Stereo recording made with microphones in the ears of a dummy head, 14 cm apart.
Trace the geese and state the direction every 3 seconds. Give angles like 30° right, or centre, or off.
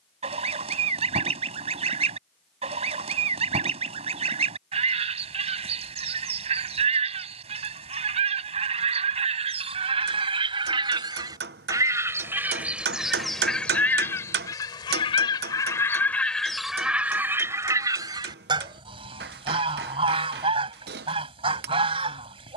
40° right, 40° right, 40° right, 30° right, centre, centre, 30° right, 40° right.